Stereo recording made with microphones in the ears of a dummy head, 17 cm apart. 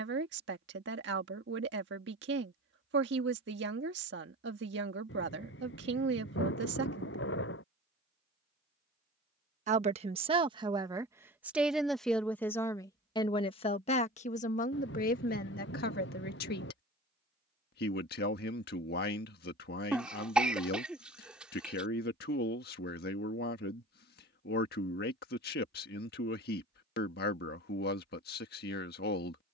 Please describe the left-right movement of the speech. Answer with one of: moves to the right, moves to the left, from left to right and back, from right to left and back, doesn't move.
moves to the left.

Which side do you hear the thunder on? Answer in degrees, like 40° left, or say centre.
60° left.